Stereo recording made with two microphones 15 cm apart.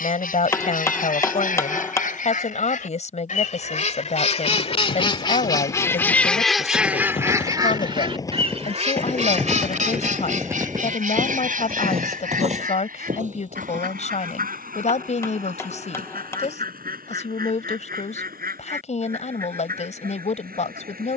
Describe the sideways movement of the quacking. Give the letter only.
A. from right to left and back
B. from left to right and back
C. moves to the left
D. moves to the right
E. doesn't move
D.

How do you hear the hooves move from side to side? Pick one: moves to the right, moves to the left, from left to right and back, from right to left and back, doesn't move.
moves to the right.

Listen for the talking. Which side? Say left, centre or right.
left.